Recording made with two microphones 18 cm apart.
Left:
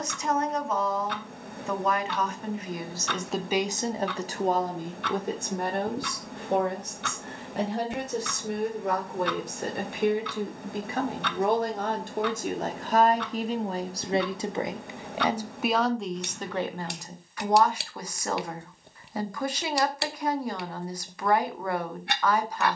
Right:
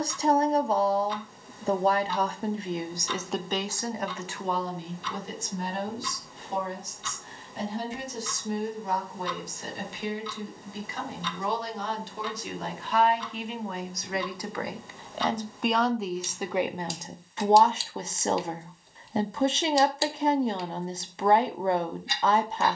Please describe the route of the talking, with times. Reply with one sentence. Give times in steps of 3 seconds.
In this clip you hear the talking on the right from 0 s, on the left from 3 s, in the centre from 15 s and on the right from 18 s.